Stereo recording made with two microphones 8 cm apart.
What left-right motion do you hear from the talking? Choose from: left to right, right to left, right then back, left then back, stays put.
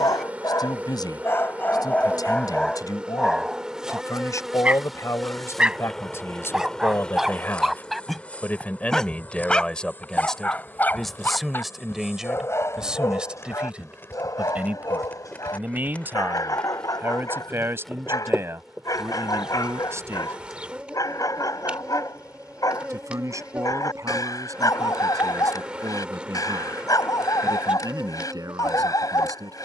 left to right.